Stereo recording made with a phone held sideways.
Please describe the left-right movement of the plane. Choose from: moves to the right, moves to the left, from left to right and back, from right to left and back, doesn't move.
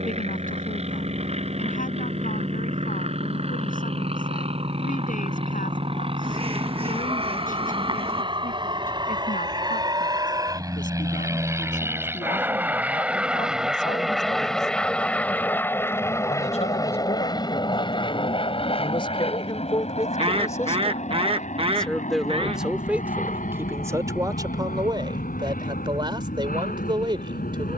moves to the left.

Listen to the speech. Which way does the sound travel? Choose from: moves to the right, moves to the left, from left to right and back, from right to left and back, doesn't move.
moves to the right.